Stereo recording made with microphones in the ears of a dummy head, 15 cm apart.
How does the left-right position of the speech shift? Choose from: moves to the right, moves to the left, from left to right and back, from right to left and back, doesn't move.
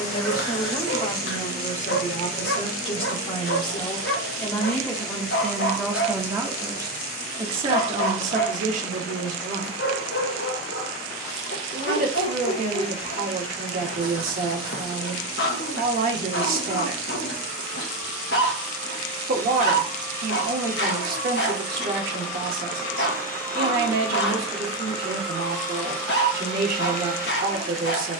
moves to the right.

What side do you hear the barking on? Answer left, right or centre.
left.